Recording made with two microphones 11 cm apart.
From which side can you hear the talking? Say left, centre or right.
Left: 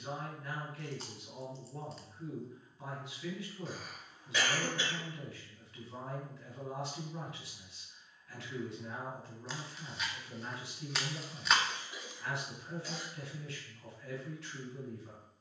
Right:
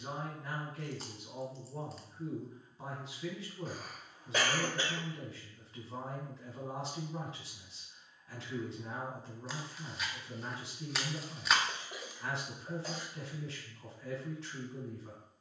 right.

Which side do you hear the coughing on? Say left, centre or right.
right.